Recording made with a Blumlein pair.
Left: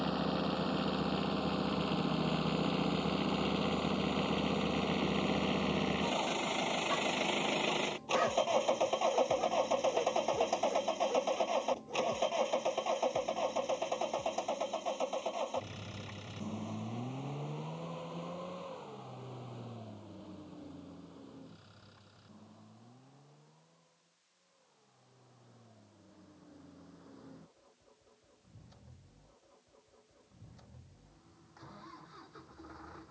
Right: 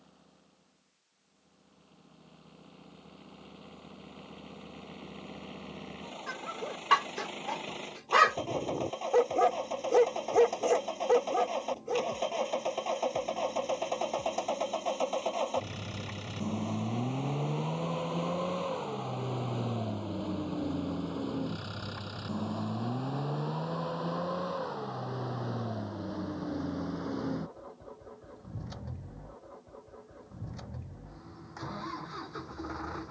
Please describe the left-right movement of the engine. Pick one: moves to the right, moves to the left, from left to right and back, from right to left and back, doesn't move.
moves to the right.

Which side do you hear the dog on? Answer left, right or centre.
right.